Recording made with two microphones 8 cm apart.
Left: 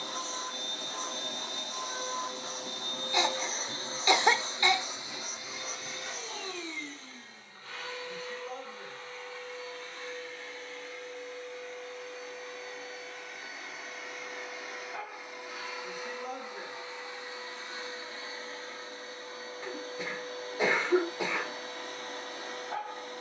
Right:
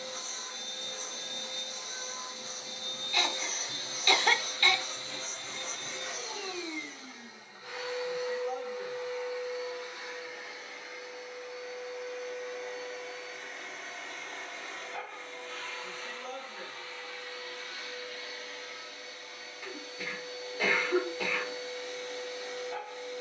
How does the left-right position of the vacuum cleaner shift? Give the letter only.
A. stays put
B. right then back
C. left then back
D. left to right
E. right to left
B.